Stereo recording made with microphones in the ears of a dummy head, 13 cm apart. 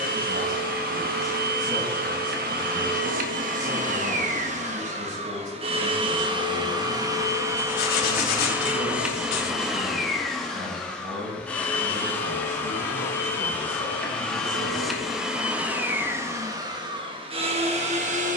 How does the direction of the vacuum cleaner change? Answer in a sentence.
You can hear the vacuum cleaner move from right to left and back again.